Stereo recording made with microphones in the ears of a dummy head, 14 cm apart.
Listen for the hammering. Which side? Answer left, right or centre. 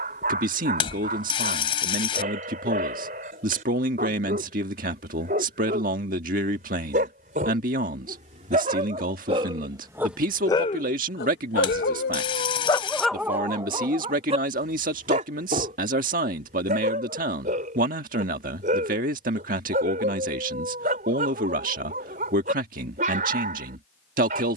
left.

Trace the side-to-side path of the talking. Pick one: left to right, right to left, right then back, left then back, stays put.
stays put.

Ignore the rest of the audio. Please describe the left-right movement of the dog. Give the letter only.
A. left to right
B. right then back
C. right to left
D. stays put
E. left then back
E.